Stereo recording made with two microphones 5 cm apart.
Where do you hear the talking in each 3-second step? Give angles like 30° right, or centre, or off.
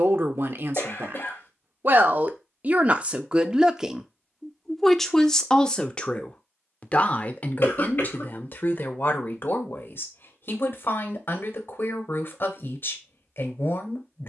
50° right, centre, 40° left, 50° left, 50° left.